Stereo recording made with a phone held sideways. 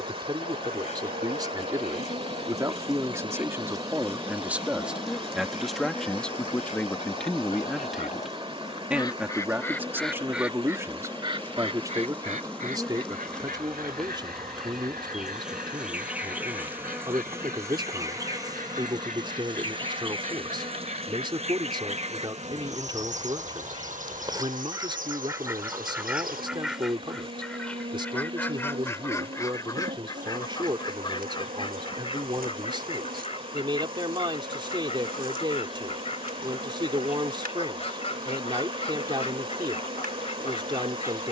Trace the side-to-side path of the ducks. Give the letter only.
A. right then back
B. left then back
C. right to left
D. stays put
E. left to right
A.